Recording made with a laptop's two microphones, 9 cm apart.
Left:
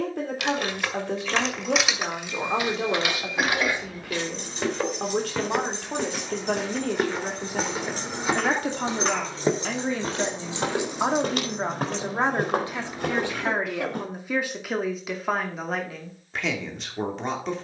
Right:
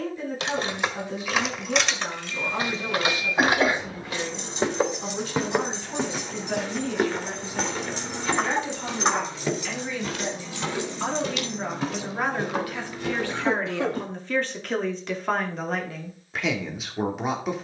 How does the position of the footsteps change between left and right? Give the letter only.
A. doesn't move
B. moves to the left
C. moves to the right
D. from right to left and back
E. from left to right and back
B.